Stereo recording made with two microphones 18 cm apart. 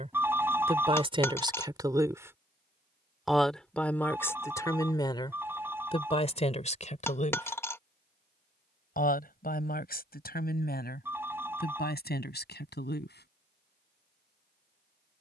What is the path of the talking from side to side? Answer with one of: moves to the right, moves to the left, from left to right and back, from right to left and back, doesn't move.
moves to the left.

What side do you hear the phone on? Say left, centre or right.
centre.